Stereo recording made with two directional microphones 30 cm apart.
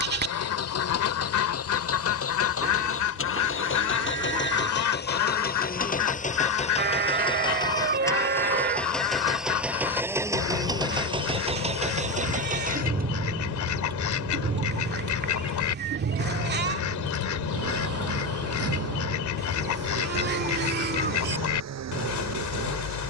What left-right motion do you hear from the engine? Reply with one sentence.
In this clip you hear the engine travel towards the right.